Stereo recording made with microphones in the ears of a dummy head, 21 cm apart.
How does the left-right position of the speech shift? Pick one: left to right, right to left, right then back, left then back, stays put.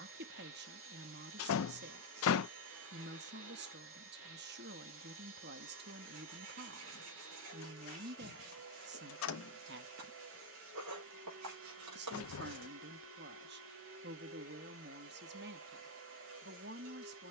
stays put.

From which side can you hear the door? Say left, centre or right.
left.